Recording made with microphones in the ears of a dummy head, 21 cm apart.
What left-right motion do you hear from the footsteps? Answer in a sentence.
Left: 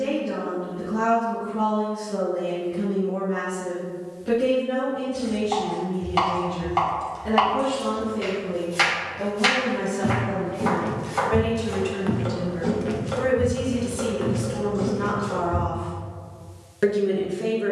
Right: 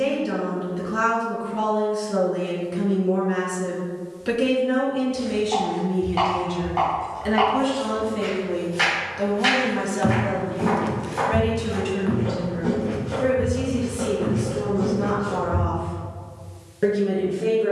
You can hear the footsteps move from right to left.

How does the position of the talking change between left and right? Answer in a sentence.
You can hear the talking go from the right side to the left.